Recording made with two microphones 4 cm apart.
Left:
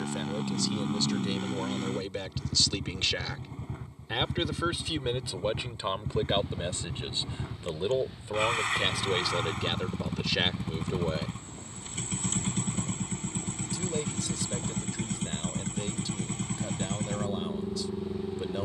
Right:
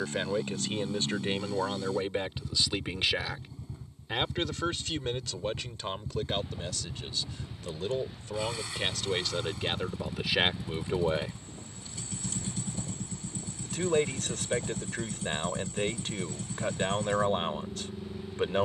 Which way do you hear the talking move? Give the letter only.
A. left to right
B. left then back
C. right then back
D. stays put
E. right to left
B.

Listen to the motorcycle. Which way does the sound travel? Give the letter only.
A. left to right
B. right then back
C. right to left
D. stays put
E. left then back
D.